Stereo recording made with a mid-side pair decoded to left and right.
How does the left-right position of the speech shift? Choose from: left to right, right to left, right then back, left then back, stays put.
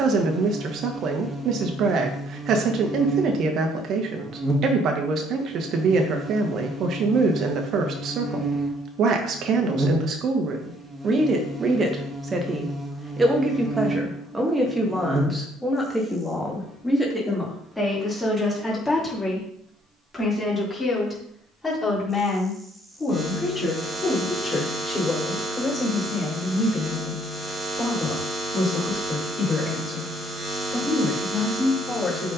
right to left.